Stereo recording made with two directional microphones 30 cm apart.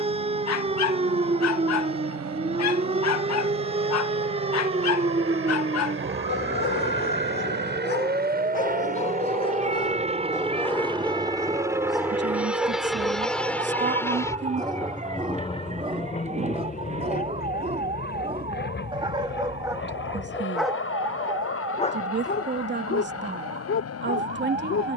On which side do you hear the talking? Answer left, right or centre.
right.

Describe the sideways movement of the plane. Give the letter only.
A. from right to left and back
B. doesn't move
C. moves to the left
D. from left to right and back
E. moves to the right
C.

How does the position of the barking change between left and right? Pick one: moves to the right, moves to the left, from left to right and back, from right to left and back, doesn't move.
from left to right and back.